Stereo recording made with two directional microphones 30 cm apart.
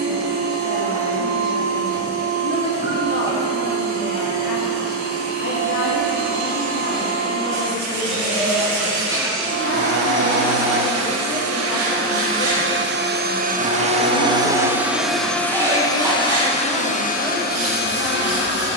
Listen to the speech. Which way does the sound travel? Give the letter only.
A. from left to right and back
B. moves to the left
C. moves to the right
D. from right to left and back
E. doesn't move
E.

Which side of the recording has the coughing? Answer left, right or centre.
centre.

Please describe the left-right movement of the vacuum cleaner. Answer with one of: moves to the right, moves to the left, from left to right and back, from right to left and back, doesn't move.
moves to the left.